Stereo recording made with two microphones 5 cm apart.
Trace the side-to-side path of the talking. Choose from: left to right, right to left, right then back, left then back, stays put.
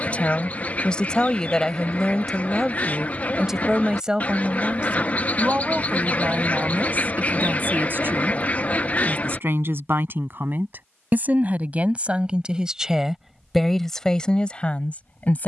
right then back.